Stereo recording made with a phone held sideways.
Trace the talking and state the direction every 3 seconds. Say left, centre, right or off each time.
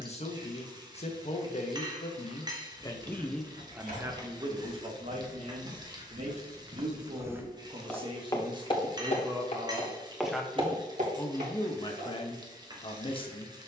left, right, right, centre, left.